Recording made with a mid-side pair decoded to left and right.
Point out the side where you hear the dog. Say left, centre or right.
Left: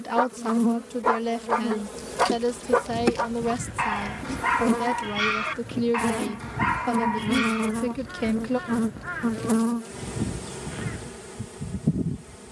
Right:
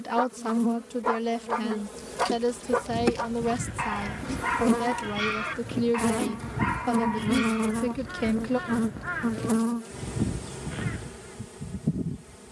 left.